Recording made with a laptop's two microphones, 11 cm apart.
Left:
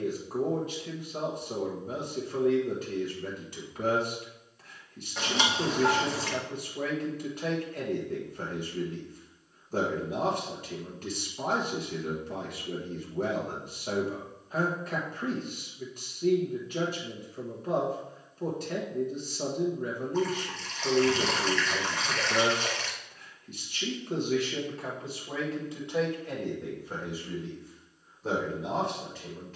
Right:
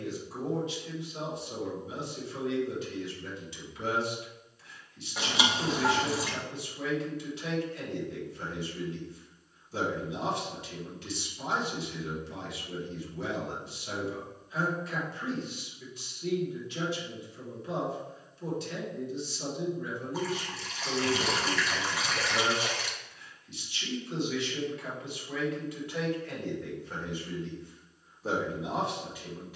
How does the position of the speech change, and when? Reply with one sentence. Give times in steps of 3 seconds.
In this clip you hear the speech on the left from 0 s and in the centre from 27 s.